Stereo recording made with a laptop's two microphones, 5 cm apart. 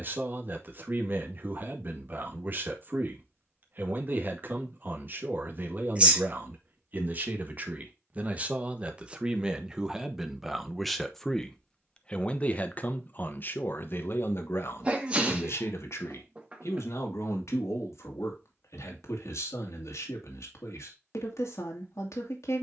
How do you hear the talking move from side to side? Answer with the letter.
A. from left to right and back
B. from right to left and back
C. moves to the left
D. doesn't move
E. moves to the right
C.